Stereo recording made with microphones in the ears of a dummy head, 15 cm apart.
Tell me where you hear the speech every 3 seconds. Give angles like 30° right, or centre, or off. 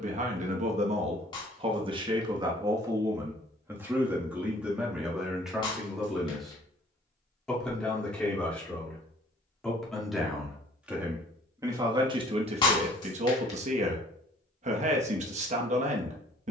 30° right, 10° right, centre, 10° right, 40° right, 40° right.